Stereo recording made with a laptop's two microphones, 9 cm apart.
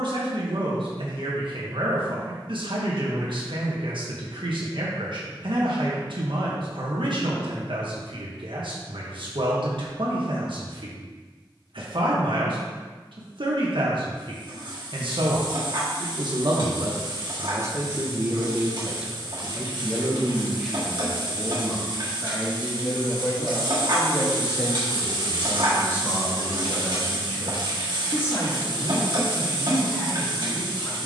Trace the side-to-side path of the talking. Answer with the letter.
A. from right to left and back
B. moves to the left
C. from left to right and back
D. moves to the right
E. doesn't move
B.